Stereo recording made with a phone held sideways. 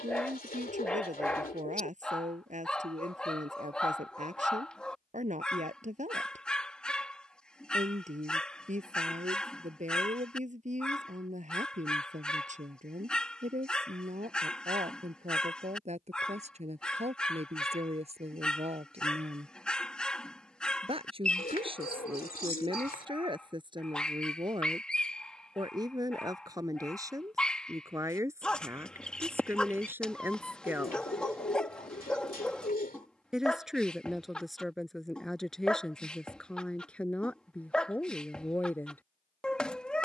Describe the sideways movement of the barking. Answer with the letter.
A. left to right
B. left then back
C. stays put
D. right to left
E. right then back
C.